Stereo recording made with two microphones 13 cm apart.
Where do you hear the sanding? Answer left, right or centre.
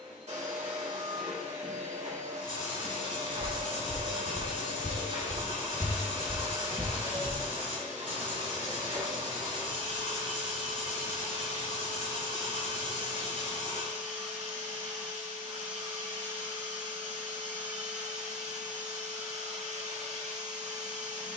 left.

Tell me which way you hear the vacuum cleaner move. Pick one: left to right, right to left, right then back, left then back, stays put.
stays put.